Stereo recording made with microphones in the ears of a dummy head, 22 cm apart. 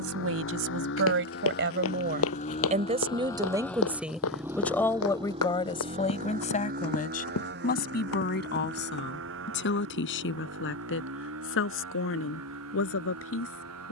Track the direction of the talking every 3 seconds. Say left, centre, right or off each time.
right, centre, left, left, left.